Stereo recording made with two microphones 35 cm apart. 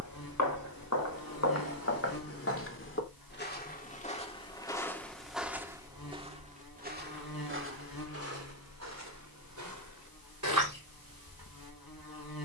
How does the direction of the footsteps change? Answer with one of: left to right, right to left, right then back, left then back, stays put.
left to right.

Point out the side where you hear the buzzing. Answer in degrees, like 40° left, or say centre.
80° left.